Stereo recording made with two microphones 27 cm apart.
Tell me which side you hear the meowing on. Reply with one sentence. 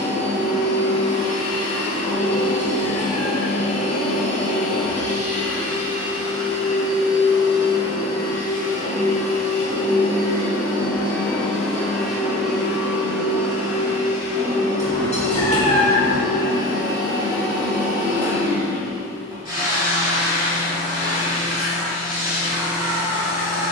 In this clip you hear the meowing on the left.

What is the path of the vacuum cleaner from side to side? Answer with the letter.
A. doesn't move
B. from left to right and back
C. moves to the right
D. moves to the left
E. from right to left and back
C.